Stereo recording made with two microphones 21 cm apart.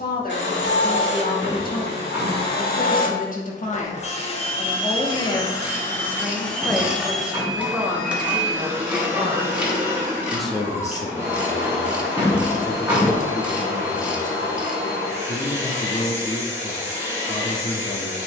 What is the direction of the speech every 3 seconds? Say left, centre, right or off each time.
left, left, centre, centre, left, left.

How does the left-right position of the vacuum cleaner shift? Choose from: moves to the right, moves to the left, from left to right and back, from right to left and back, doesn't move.
moves to the right.